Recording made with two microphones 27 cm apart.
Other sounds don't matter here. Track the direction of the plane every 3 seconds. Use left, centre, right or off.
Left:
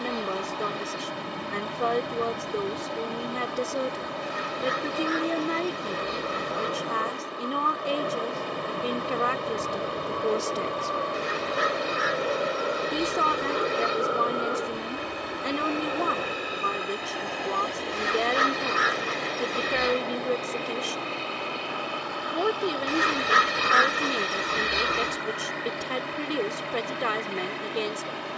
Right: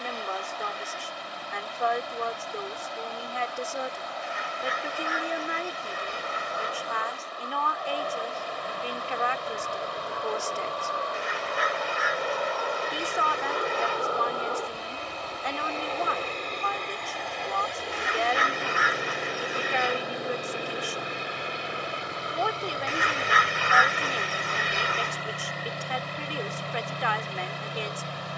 left, left, left, left, left, centre, centre, right, right, right.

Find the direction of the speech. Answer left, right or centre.
left.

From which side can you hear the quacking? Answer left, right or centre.
left.